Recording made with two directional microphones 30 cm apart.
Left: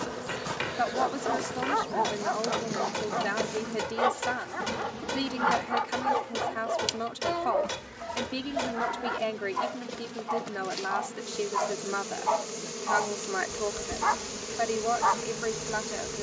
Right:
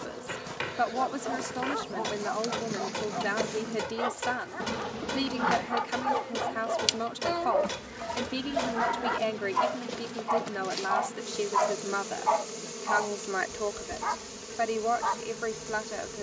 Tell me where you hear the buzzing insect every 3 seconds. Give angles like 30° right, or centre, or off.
10° left, 10° right, 30° right, 10° right, 20° left, 30° left.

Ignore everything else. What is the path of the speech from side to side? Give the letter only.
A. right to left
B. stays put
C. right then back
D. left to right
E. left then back
B.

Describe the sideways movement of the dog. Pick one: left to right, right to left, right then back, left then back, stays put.
right then back.